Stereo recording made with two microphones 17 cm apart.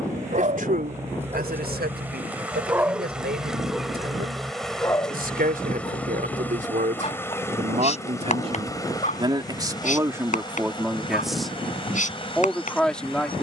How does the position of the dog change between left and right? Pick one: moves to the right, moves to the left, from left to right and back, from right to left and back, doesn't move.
moves to the left.